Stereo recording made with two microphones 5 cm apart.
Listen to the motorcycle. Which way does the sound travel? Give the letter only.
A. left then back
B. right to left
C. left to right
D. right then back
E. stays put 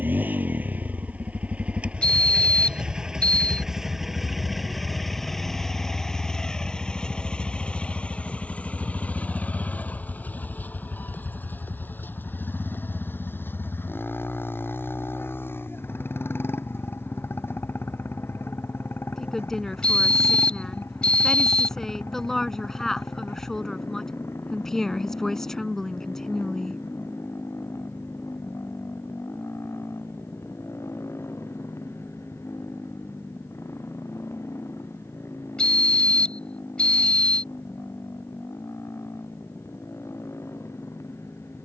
B.